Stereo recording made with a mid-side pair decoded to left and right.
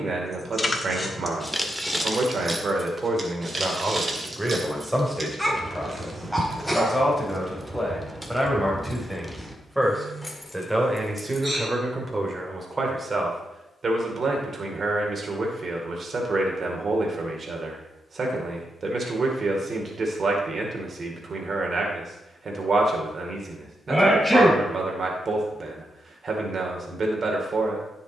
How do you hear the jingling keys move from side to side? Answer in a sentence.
In this clip you hear the jingling keys move from left to right and back again.